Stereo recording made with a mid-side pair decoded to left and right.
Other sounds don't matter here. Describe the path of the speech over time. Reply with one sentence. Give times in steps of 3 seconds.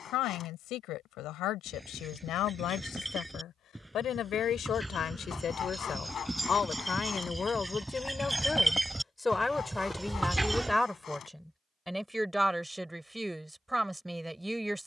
You can hear the speech on the left from 0 s and in the centre from 9 s.